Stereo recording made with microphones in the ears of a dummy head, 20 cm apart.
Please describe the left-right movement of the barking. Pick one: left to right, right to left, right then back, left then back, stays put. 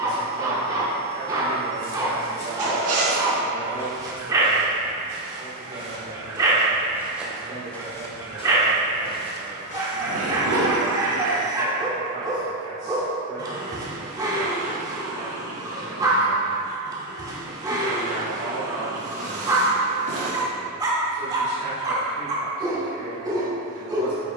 stays put.